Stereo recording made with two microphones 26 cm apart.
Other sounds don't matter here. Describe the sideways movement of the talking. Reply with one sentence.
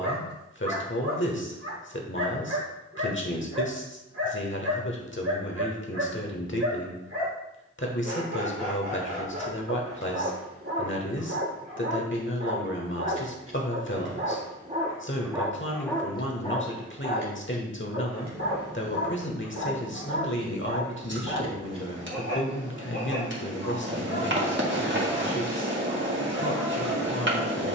In this clip you hear the talking stay put.